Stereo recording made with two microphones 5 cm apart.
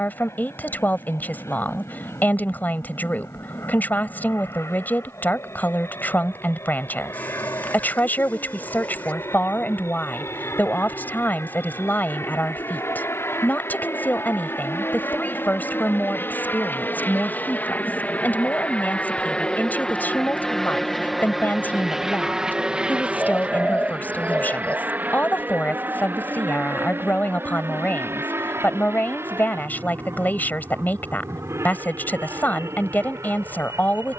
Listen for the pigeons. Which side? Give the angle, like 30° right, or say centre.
30° left.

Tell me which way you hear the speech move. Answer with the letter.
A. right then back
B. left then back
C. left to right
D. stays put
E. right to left
D.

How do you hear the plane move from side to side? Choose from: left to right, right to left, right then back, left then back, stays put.
left to right.